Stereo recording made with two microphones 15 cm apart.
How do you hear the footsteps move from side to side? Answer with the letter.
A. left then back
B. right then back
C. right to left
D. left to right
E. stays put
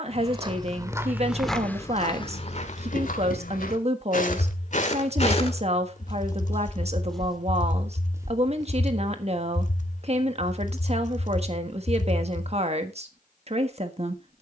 A.